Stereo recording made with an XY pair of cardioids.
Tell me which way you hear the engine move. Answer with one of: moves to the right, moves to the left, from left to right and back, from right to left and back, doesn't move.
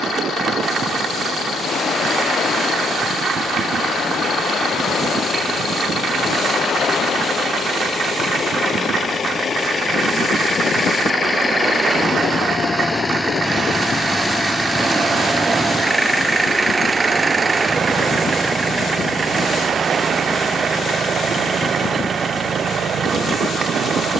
moves to the right.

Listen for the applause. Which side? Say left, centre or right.
right.